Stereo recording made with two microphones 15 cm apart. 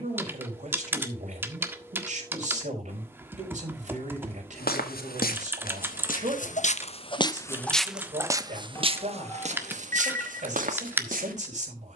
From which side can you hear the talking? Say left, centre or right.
right.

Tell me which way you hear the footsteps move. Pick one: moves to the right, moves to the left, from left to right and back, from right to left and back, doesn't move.
moves to the right.